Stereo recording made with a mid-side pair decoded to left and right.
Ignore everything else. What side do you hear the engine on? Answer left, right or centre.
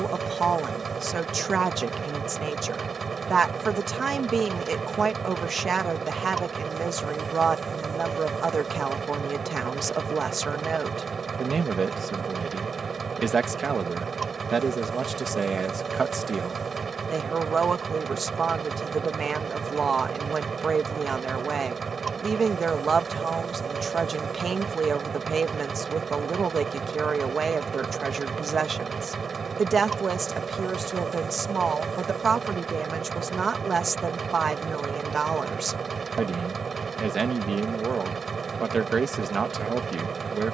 right.